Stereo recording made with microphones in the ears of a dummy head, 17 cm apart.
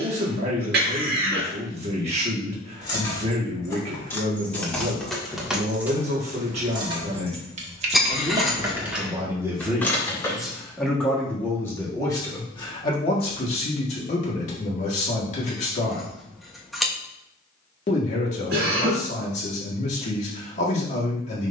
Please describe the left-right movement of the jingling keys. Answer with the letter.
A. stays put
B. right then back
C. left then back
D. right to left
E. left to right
B.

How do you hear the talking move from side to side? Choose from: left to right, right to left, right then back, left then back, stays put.
right to left.